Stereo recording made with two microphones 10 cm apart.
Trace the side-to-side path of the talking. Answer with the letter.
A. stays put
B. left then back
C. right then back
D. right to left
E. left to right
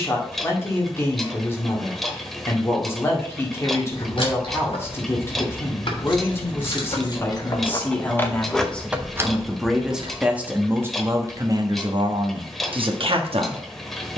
E.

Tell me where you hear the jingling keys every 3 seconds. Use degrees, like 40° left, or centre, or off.
off, 60° left, 30° left, 40° right, off.